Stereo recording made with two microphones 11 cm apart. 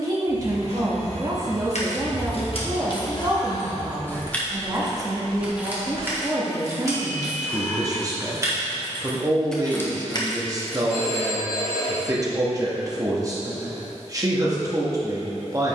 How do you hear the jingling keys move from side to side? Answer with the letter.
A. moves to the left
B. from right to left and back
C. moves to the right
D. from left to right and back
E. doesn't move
D.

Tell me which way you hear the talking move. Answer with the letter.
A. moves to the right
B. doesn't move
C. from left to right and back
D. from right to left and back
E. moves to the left
B.